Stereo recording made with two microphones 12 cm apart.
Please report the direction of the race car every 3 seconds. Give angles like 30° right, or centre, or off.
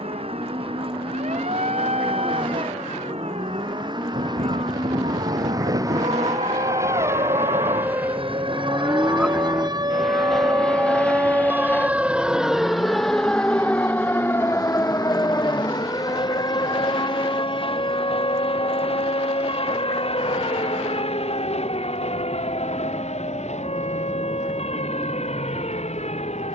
50° right, 40° right, 20° right, centre, 30° left, 40° left, 50° left, 60° left, 60° left.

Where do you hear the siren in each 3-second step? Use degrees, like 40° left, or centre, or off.
80° right, 70° right, 50° right, 30° right, 10° left, 30° left, 50° left, 50° left, 60° left.